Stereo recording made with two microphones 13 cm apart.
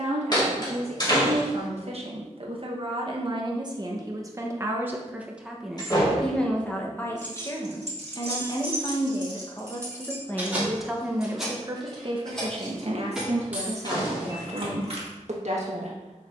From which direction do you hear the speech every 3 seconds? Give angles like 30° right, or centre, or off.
60° right, 20° right, 20° left, 10° left, 60° right, 60° right.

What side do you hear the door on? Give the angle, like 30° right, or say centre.
40° left.